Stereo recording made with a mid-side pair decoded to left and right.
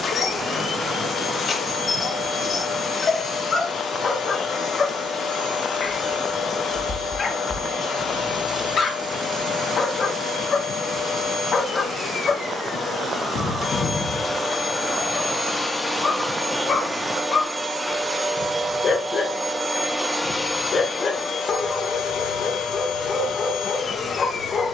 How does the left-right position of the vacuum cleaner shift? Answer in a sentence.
You can hear the vacuum cleaner move from left to right and back again.